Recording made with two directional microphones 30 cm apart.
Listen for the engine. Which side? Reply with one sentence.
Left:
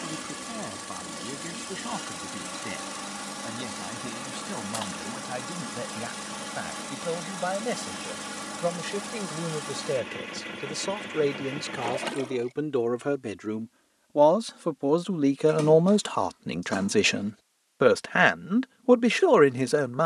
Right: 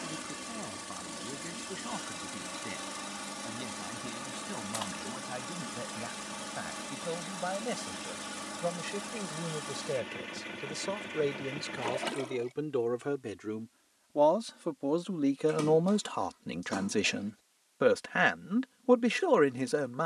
You can hear the engine on the left.